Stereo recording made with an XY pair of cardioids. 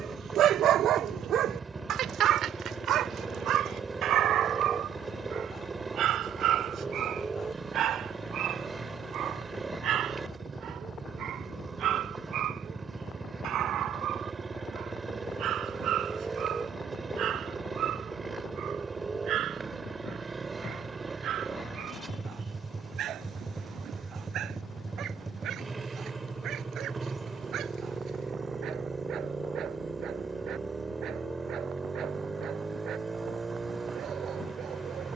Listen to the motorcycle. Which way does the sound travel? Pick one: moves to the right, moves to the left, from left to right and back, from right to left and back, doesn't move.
doesn't move.